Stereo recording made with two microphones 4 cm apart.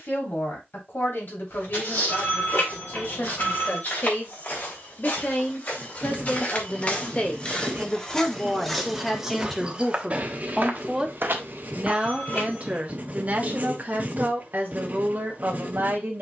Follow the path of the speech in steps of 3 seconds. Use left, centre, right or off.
left, left, left, centre, right, right.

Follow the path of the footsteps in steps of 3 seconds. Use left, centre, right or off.
left, left, left, right, off, off.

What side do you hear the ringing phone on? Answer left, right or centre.
left.